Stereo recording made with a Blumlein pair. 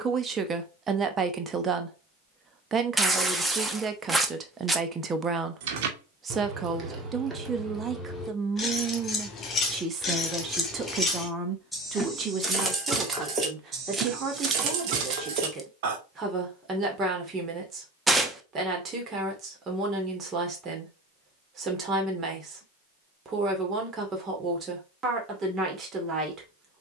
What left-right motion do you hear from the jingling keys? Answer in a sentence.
You can hear the jingling keys go left and come back.